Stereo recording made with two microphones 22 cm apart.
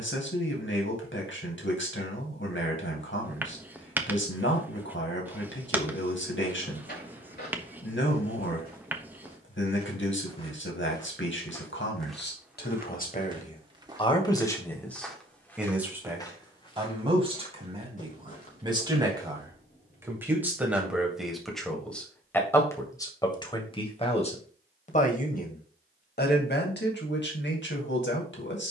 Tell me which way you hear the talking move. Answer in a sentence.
In this clip you hear the talking move from left to right and back again.